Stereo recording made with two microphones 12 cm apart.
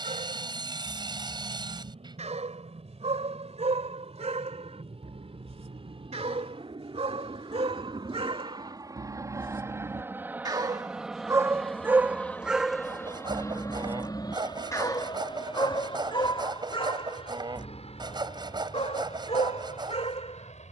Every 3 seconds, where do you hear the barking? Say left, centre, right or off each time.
right, right, right, right, centre, left, left.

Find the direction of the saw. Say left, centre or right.
right.